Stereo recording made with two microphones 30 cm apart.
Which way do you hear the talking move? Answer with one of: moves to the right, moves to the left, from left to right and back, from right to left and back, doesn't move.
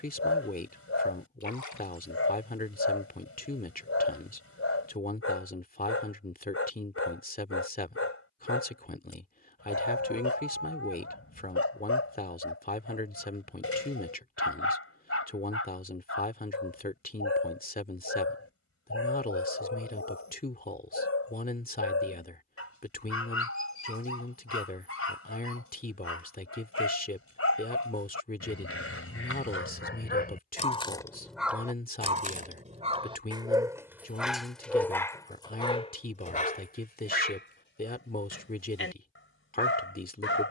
doesn't move.